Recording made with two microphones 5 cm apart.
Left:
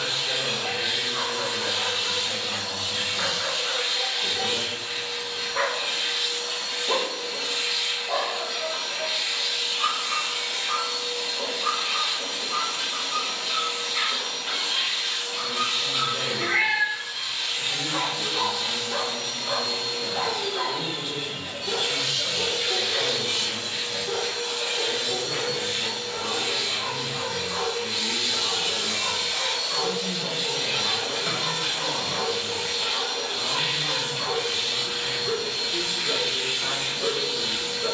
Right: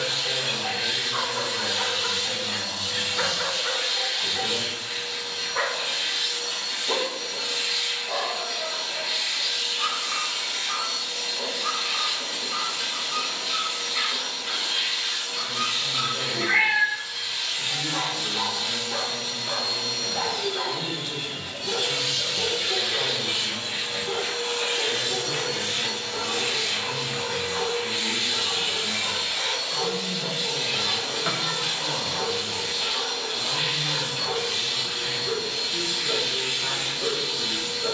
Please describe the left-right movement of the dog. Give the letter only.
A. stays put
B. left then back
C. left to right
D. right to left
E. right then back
D.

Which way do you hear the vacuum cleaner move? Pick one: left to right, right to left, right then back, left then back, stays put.
right then back.